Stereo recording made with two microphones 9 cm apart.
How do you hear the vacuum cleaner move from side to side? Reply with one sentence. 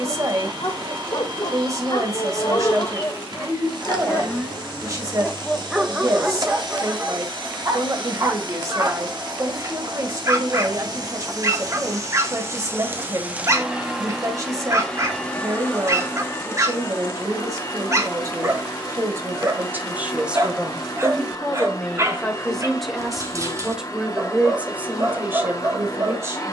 You can hear the vacuum cleaner travel towards the left.